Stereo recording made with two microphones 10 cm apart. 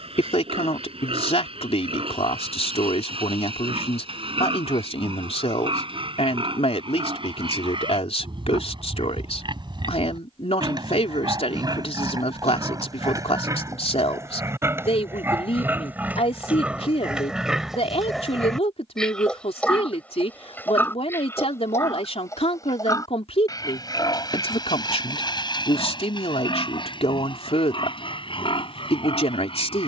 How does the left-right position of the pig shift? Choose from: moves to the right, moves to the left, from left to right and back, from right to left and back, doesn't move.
moves to the left.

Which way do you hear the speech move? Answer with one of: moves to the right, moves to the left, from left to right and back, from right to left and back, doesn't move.
doesn't move.